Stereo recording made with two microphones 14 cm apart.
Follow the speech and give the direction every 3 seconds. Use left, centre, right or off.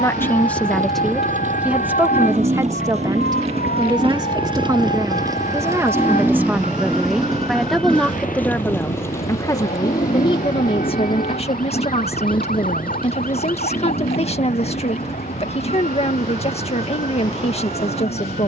centre, right, centre, left, left, left.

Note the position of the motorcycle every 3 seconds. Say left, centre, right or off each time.
right, right, centre, left, left, left.